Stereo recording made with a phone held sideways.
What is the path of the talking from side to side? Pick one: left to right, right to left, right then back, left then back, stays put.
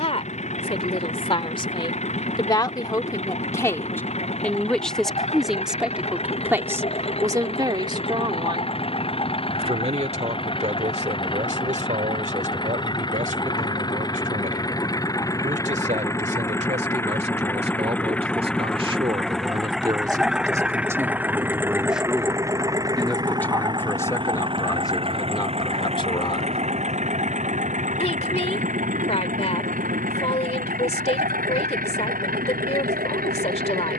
right then back.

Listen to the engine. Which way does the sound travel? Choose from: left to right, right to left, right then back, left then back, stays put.
left to right.